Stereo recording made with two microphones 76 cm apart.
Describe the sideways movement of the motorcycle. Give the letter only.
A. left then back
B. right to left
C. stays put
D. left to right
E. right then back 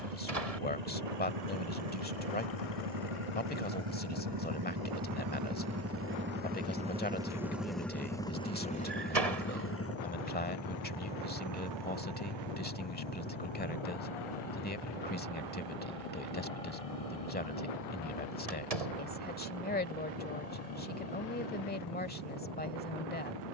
B.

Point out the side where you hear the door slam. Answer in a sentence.
In this clip you hear the door slam on the right.